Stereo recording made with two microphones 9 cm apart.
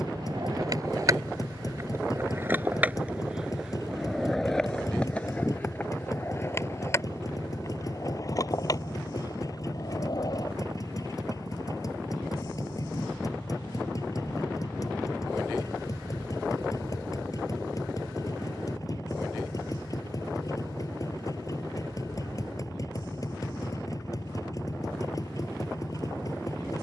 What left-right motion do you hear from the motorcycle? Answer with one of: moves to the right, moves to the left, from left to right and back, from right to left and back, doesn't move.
doesn't move.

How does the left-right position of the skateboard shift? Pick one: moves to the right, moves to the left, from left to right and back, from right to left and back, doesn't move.
moves to the left.